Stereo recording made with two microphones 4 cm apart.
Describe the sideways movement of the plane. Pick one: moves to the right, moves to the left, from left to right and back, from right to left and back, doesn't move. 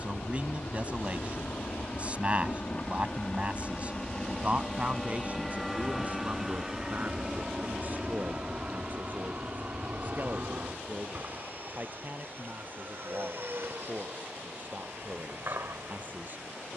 moves to the right.